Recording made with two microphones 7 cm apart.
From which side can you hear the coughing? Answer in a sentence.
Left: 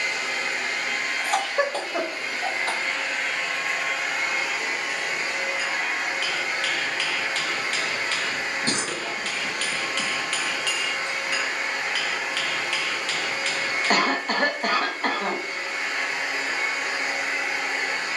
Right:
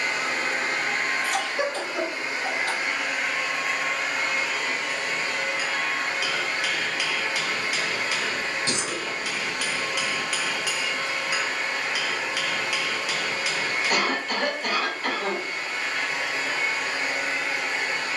In this clip you hear the coughing on the left.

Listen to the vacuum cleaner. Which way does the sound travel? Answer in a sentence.
You can hear the vacuum cleaner move from right to left.